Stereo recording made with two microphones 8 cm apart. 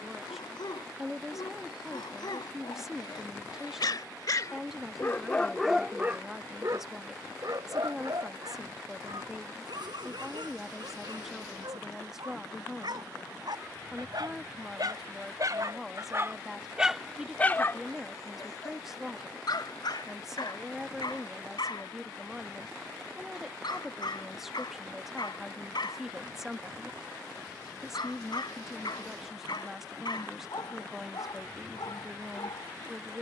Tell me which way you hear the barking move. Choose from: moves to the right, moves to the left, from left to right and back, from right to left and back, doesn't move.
from left to right and back.